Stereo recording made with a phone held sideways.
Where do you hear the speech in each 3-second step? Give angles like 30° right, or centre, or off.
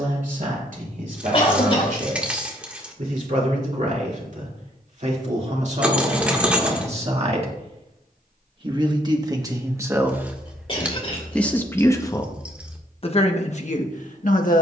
60° right, 50° right, 40° right, 10° right, 40° left.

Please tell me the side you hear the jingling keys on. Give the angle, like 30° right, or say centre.
10° right.